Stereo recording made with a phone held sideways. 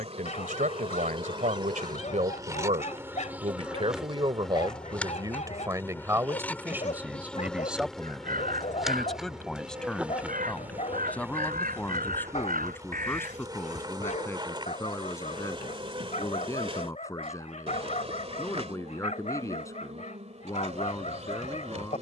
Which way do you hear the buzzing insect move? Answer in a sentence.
In this clip you hear the buzzing insect move from right to left and back again.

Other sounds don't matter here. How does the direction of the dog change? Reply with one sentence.
In this clip you hear the dog stay put.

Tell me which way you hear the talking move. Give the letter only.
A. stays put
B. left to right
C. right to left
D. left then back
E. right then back
C.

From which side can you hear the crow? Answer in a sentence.
In this clip you hear the crow on the right.